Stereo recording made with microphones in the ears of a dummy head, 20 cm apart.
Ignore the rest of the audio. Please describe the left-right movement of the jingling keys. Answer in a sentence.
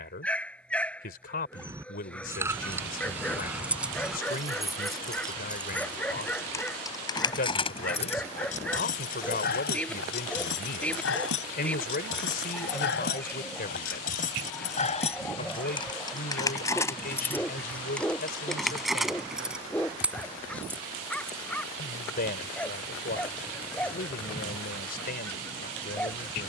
In this clip you hear the jingling keys go left and come back.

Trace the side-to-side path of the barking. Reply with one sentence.
You can hear the barking stay put.